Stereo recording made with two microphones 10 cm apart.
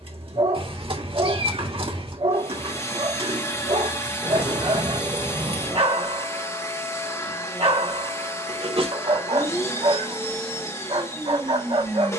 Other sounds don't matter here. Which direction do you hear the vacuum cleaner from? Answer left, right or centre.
left.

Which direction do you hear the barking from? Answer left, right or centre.
right.